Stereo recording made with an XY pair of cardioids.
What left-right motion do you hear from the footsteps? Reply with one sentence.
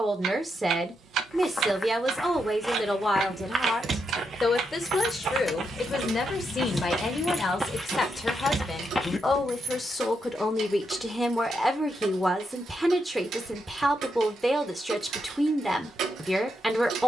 You can hear the footsteps move from left to right and back again.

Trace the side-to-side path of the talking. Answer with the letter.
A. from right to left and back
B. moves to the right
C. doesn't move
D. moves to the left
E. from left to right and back
A.